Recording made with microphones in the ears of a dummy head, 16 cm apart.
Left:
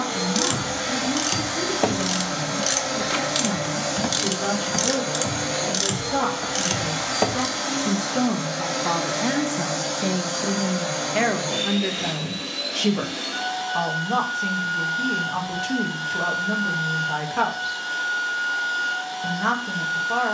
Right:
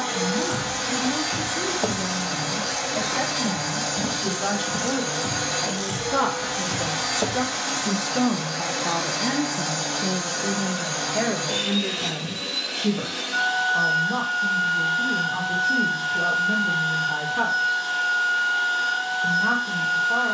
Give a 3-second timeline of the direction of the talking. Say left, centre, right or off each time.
right, right, right, left, left, left, left.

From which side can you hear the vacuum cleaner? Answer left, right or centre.
right.